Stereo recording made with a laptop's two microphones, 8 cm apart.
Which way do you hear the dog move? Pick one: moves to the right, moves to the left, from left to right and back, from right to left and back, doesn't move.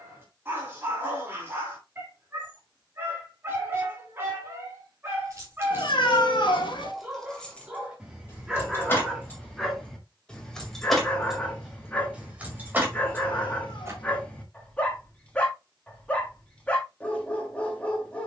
moves to the left.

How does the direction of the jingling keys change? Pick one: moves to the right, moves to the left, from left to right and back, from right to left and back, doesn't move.
from right to left and back.